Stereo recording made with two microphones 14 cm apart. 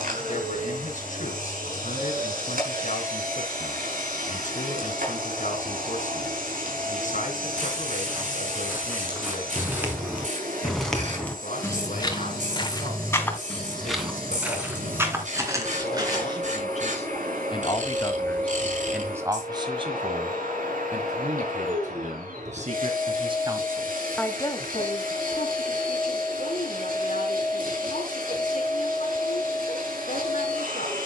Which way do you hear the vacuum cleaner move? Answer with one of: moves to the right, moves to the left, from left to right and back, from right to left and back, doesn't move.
doesn't move.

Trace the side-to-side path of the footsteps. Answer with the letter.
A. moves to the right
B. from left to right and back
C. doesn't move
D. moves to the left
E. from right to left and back
E.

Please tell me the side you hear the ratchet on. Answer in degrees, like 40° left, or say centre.
60° right.